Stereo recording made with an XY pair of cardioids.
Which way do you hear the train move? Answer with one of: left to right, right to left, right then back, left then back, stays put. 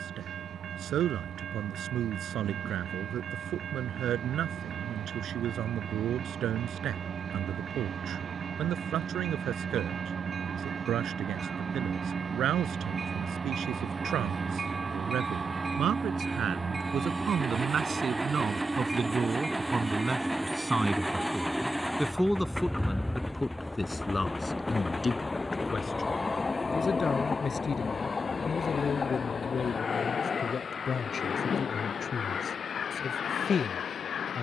right to left.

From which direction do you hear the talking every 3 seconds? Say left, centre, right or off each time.
right, right, right, right, right, right, right, centre, left, left, left, left.